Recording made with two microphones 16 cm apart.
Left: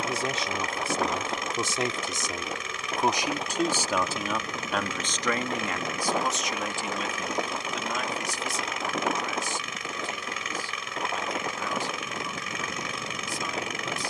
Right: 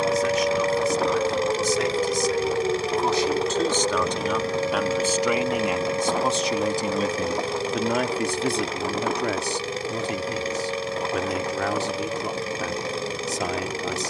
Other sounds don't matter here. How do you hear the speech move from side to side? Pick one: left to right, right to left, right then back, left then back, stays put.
left to right.